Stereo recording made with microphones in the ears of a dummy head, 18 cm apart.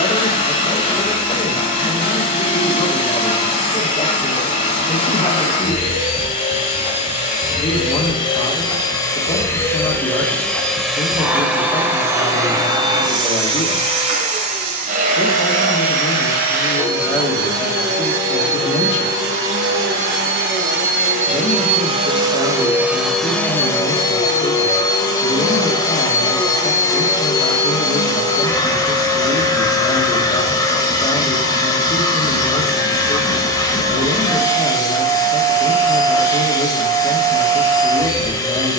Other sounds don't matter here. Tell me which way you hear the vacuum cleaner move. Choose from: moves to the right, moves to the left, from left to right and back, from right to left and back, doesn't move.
from left to right and back.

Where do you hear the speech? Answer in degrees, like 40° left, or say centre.
30° left.